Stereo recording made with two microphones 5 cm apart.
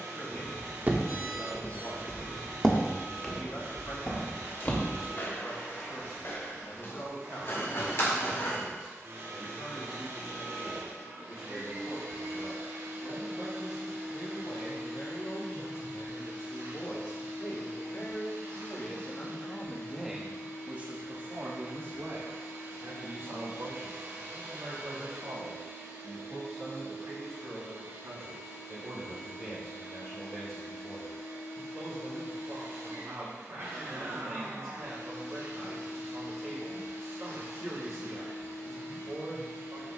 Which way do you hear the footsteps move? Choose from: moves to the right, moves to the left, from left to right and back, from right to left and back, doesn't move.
moves to the left.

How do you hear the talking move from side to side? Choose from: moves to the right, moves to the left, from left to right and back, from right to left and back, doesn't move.
moves to the right.